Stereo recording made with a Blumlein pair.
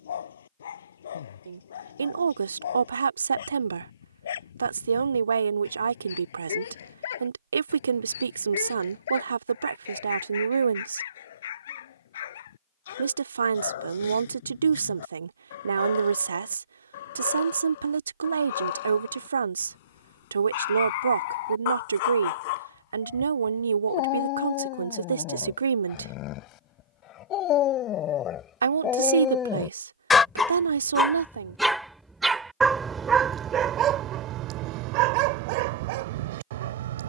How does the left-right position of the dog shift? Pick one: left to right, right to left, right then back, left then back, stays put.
left to right.